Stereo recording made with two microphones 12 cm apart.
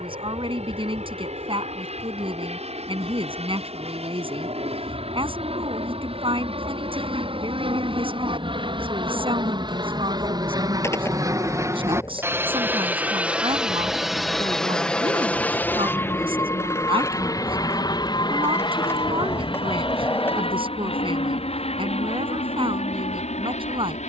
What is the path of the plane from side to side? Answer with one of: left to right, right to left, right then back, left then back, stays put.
right to left.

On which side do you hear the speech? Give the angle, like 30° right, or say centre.
50° right.